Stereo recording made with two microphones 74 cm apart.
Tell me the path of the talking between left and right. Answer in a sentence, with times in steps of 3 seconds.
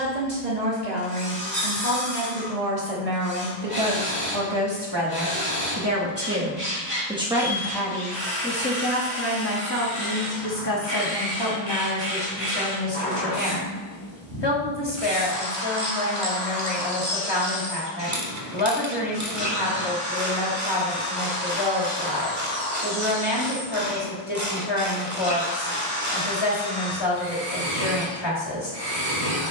In this clip you hear the talking on the right from 0 s, in the centre from 6 s and on the left from 9 s.